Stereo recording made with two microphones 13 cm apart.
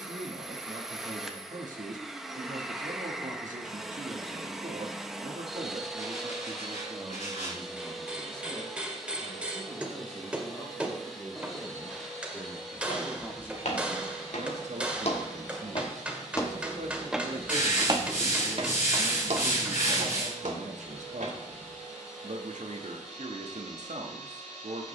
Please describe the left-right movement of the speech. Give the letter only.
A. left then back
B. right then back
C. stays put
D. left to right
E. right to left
A.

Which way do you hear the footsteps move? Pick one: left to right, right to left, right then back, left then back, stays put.
left to right.